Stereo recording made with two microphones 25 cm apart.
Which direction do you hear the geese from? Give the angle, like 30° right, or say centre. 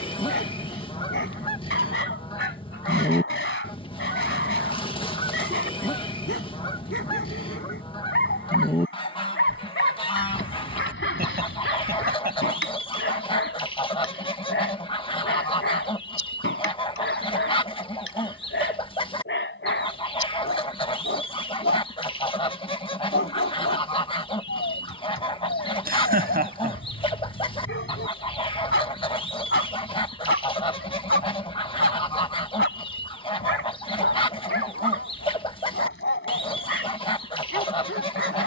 20° left.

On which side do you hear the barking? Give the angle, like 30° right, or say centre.
60° left.